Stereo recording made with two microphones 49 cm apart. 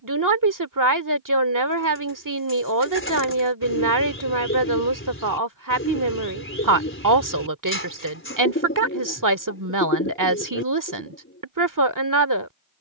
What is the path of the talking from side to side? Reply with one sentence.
You can hear the talking stay put.